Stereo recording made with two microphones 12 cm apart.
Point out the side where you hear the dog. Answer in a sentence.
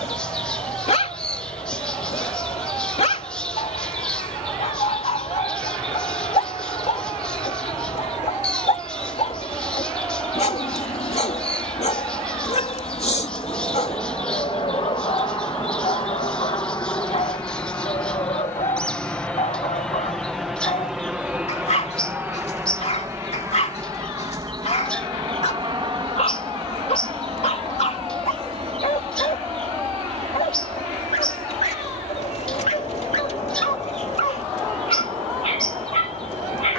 You can hear the dog on the left.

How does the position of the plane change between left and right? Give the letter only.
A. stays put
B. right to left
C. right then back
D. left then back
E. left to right
E.